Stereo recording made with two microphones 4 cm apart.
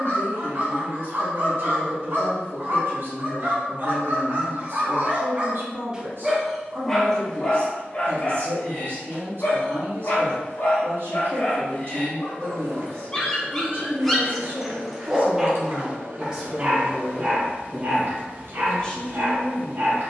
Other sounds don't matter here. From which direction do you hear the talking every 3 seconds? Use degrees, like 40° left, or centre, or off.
60° right, 60° right, 60° right, 60° right, 50° right, 10° right, 20° left.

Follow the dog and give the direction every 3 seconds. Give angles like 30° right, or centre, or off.
50° right, 40° right, 20° left, 40° left, 10° left, 30° right, 50° right.